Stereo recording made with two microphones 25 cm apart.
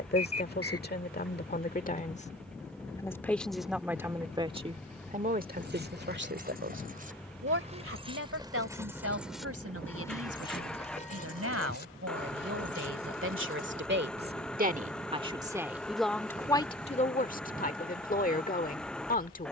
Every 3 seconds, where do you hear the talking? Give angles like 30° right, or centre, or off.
40° left, 20° right, 60° right, 70° right, 50° right, 10° left, 30° left.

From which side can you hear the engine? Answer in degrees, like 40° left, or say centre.
centre.